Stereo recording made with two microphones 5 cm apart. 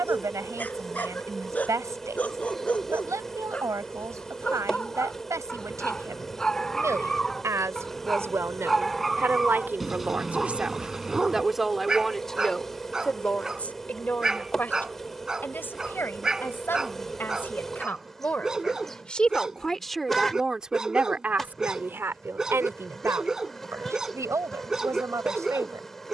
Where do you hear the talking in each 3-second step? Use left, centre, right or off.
right, right, right, right, left, left, centre, right, right.